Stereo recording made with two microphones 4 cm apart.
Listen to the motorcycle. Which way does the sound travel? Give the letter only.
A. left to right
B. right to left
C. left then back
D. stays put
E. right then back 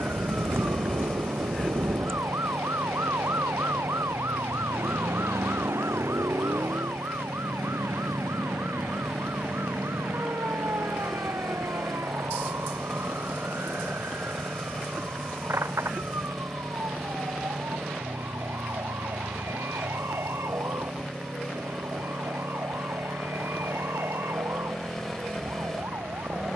D.